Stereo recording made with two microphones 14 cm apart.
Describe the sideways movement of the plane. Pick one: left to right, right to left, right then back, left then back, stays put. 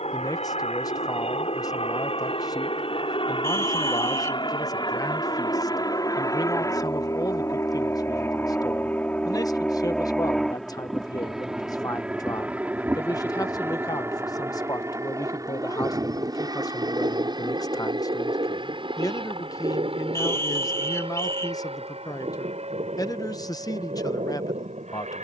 left to right.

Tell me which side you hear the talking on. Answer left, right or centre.
left.